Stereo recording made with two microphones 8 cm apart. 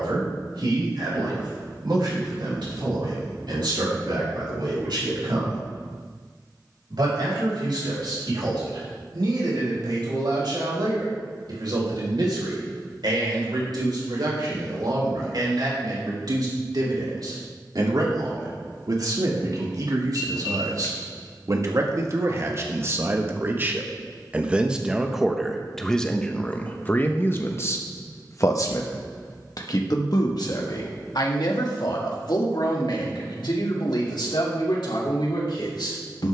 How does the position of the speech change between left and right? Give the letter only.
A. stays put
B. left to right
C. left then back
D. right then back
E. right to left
E.